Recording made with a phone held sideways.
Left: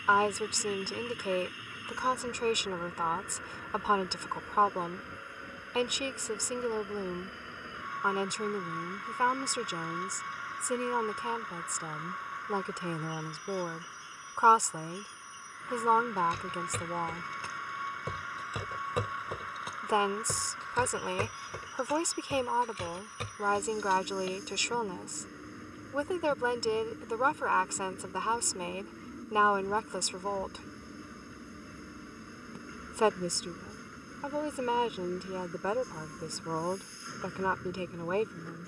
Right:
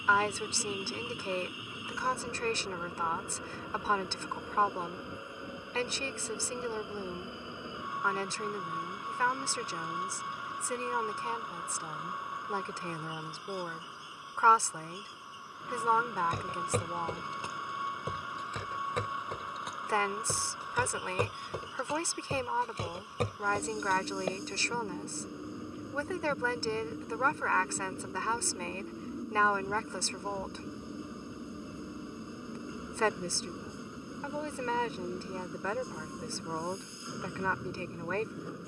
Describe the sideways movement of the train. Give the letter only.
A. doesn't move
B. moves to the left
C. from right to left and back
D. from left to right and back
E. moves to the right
A.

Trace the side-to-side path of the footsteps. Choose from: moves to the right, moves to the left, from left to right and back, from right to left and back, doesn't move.
from right to left and back.